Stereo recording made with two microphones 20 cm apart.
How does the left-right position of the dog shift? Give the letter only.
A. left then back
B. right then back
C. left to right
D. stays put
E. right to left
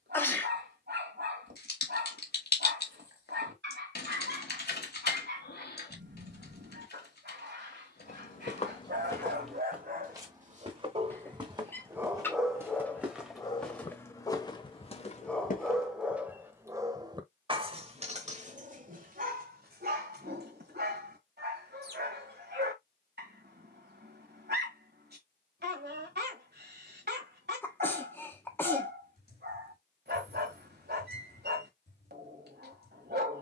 A.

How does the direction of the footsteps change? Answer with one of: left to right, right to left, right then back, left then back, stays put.
right then back.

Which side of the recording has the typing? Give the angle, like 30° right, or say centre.
60° left.